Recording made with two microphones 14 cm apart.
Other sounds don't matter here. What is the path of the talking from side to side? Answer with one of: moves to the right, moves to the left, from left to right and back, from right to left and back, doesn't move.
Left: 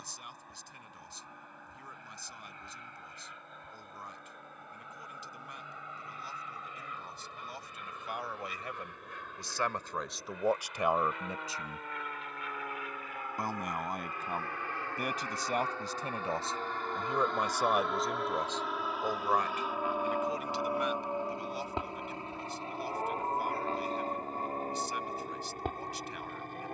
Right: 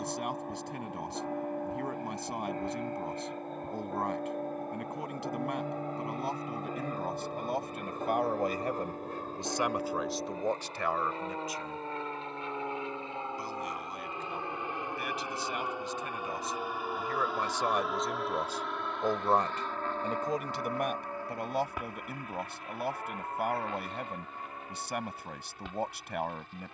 from right to left and back.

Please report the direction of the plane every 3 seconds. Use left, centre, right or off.
right, right, right, right, right, centre, centre, left, left.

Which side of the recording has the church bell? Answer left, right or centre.
right.